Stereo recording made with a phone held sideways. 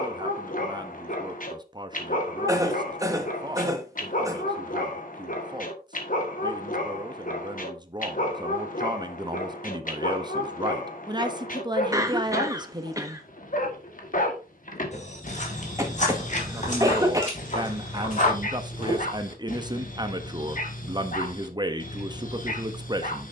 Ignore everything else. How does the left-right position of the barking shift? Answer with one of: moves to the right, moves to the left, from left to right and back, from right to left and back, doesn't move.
doesn't move.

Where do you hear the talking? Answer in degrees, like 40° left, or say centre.
30° right.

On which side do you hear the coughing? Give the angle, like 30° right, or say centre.
20° right.